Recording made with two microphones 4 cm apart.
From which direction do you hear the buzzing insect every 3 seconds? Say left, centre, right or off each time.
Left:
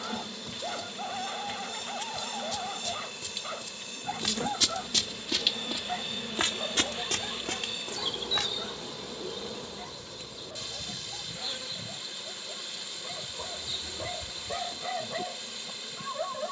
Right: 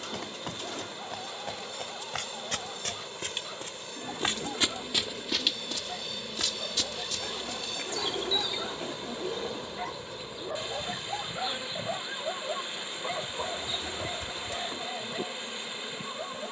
left, left, left, centre, right, right.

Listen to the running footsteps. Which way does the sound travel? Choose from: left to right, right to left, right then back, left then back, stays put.
right to left.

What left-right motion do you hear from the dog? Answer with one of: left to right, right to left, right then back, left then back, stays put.
right then back.